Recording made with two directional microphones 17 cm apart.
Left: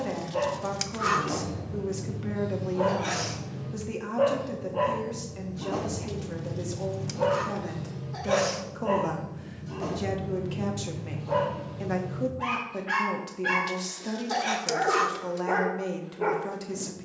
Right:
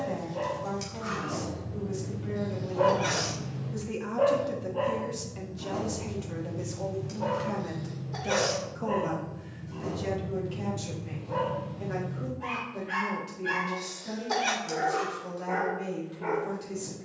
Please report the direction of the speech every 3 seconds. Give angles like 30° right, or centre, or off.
60° left, 10° left, 10° left, 40° left, 60° left, 60° left.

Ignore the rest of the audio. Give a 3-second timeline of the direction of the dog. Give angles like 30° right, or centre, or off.
30° left, 20° left, 60° left, 70° left, 70° left, 70° left.